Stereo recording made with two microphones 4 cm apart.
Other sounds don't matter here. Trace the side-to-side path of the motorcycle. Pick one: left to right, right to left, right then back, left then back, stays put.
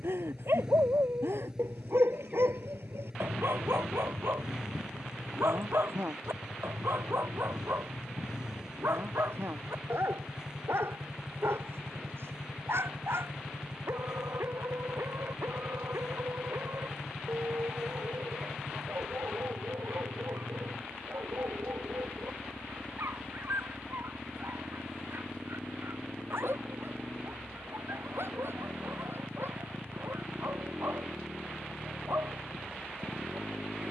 stays put.